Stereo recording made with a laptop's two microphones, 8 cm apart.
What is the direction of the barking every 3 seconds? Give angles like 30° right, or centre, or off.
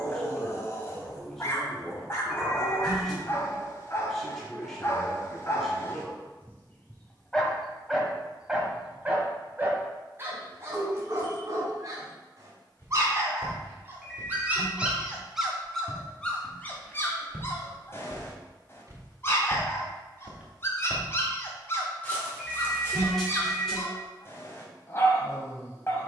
30° left, 30° left, centre, 40° right, 30° right, 20° left, 30° left, 30° left, 30° left.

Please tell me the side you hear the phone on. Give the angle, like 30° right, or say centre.
centre.